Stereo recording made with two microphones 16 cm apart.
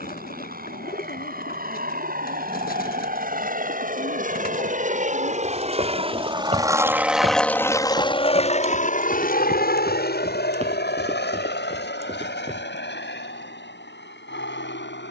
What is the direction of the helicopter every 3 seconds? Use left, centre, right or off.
right, right, centre, left, left.